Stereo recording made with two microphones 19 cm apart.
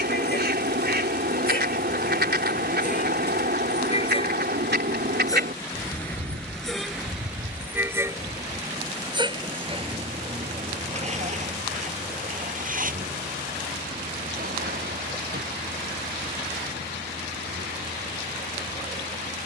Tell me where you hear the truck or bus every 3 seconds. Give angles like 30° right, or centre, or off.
50° left, 30° left, 10° right, 30° right, 50° right, 60° right, 60° right.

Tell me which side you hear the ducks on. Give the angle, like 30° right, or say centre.
60° right.